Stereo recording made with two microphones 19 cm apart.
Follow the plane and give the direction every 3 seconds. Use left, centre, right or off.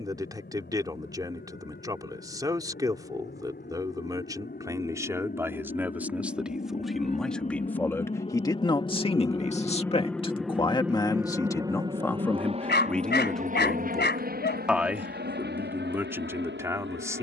left, left, left, centre, right, right.